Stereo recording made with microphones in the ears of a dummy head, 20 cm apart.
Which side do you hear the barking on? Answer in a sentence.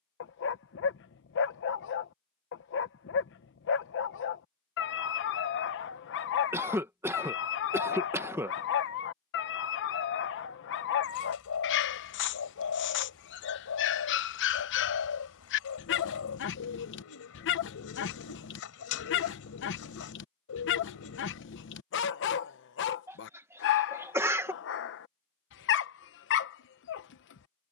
You can hear the barking on the left.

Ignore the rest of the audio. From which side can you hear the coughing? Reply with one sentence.
In this clip you hear the coughing in the centre.